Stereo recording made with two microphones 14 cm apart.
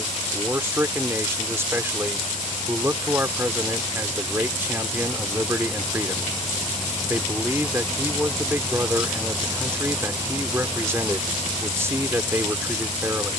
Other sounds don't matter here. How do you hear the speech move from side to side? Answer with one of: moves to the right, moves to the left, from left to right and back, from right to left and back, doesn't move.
doesn't move.